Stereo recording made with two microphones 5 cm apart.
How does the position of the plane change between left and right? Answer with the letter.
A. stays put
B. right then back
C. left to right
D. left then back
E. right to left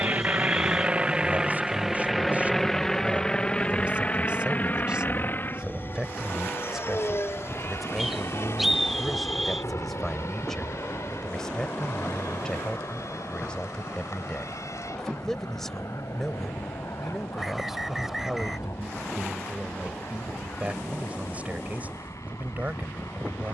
E.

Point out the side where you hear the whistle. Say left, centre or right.
centre.